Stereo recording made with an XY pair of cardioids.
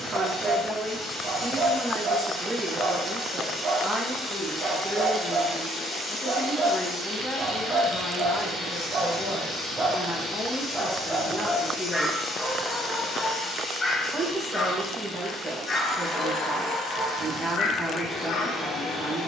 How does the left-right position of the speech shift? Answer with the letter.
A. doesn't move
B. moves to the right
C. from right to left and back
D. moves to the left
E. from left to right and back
C.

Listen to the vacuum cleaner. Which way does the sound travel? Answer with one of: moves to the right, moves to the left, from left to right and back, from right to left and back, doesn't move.
doesn't move.